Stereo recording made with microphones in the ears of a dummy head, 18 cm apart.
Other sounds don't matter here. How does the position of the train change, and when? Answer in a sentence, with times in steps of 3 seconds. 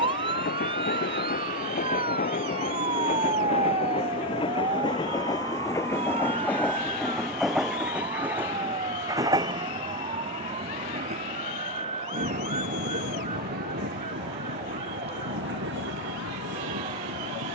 In this clip you hear the train on the left from 0 s, in the centre from 6 s and on the right from 9 s.